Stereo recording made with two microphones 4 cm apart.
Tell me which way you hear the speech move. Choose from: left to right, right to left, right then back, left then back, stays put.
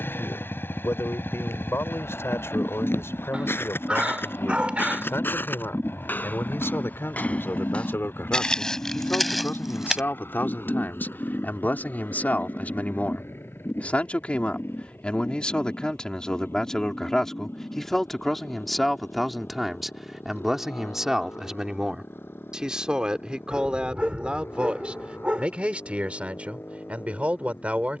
left to right.